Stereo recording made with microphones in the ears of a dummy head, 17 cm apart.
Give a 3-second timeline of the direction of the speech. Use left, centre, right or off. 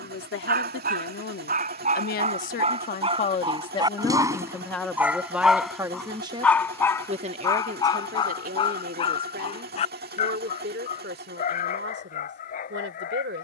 left, centre, right, right, right.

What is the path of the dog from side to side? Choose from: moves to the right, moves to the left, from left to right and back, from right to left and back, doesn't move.
moves to the left.